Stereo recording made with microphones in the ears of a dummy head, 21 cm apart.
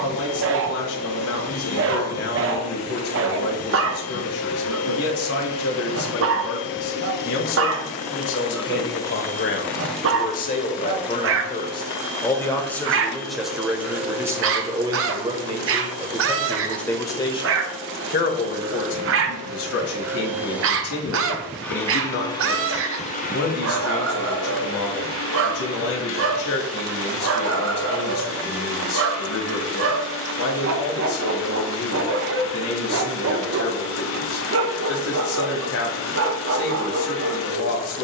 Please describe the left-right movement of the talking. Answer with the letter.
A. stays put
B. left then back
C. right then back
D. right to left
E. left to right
C.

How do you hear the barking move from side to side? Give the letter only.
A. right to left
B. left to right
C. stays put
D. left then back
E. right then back
C.